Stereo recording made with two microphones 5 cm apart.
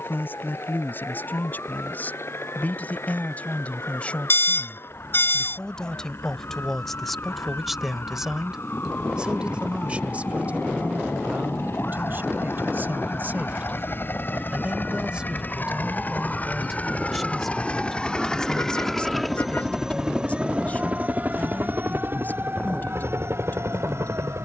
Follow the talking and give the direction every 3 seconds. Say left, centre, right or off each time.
left, left, centre, right, right, centre, left, left.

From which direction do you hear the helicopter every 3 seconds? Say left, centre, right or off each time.
left, left, left, left, left, left, centre, right.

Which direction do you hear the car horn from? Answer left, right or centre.
left.